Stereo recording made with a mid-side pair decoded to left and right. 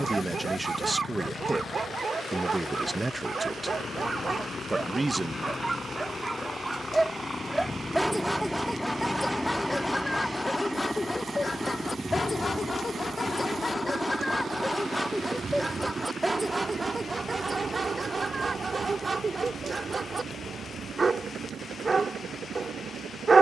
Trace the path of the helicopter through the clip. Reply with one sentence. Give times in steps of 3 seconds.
In this clip you hear the helicopter on the left from 0 s, in the centre from 9 s and on the right from 12 s.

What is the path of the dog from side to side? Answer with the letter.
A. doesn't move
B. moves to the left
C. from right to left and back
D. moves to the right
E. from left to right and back
C.